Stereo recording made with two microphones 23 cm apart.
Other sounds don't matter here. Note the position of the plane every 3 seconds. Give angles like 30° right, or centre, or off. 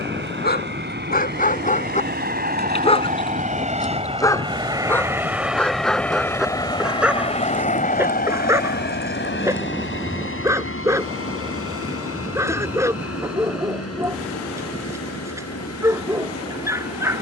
50° right, 20° right, 30° left, 50° left, 70° left, 70° left.